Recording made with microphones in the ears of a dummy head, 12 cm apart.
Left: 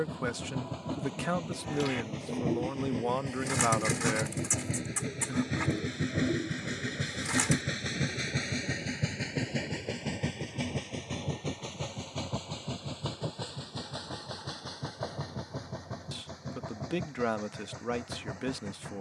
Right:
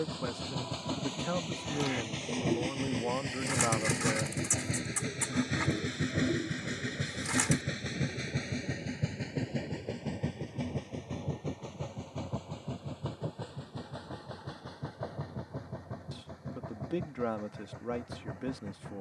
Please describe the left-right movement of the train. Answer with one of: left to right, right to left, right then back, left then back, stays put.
right to left.